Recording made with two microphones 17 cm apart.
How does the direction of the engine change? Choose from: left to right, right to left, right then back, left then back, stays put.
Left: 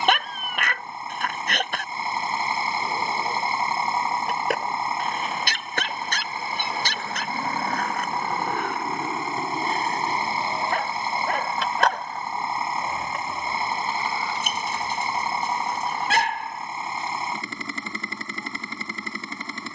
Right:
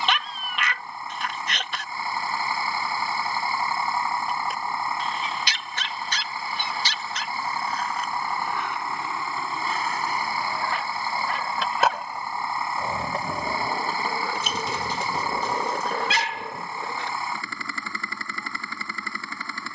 stays put.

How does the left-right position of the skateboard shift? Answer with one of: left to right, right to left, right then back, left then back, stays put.
left to right.